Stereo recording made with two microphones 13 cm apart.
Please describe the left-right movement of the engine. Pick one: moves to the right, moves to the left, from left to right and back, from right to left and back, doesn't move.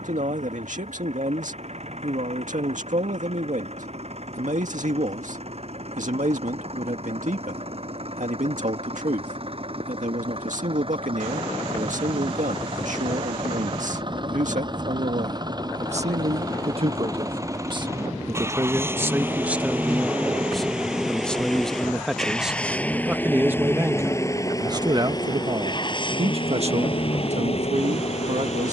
moves to the left.